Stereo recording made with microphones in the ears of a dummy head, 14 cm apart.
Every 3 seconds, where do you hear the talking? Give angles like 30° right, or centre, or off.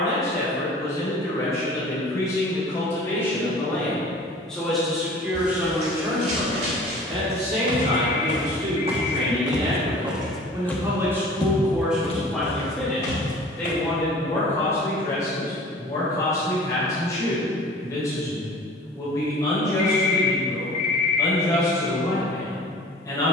20° left, centre, 40° right, 20° right, 10° left, 20° left, 20° left, 20° left.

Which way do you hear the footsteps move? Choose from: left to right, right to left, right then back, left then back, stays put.
right to left.